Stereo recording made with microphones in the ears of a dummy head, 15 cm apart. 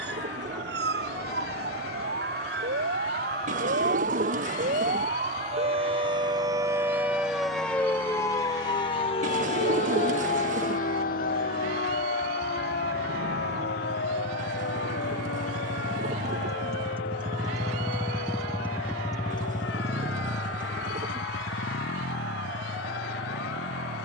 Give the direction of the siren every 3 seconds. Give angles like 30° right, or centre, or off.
70° right, 50° right, centre, 50° left, 70° left, 70° left, 80° left, 80° left.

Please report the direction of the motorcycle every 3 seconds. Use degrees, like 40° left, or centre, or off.
80° right, 80° right, 80° right, 70° right, 60° right, 40° right, 30° left, 70° left.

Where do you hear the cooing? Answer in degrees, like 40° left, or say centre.
50° right.